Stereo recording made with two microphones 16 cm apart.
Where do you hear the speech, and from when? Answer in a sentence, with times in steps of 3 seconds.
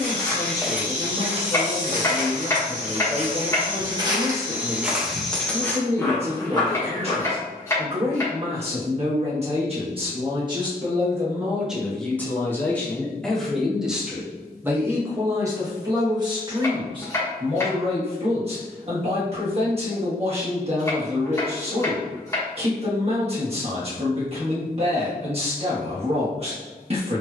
In this clip you hear the speech on the right from 0 s, in the centre from 12 s and on the right from 15 s.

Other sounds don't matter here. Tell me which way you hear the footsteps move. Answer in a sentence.
You can hear the footsteps move from left to right and back again.